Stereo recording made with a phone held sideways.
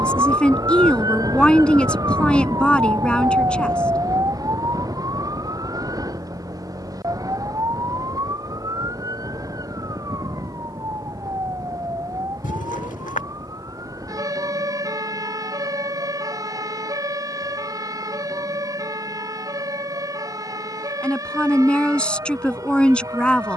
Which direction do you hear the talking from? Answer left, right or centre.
centre.